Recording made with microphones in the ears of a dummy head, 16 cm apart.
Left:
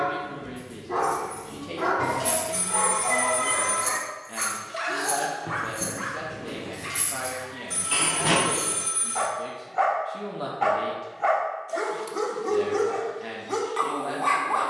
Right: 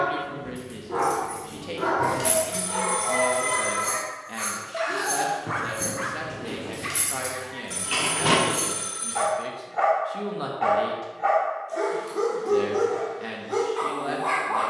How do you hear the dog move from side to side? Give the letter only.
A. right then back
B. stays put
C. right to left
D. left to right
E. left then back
A.